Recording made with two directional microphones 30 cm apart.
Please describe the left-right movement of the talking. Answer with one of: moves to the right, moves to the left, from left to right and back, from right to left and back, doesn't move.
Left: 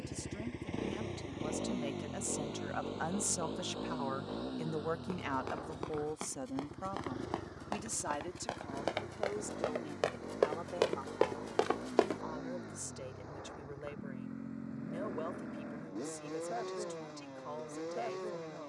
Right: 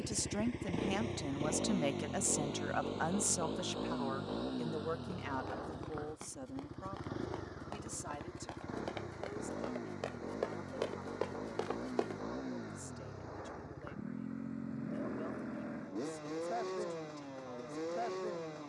moves to the left.